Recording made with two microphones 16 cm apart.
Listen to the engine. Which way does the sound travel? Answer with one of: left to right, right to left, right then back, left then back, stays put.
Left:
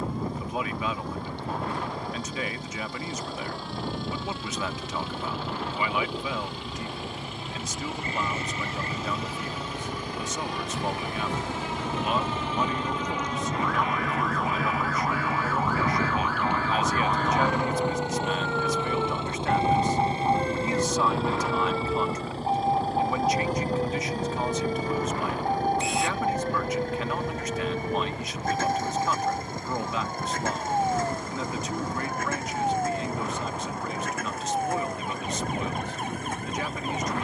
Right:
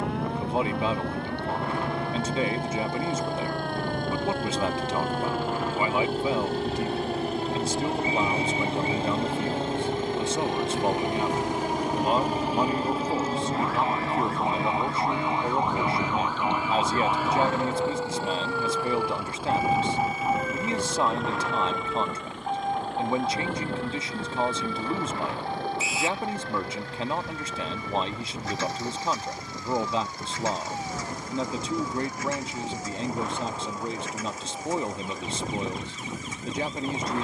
right to left.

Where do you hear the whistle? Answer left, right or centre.
centre.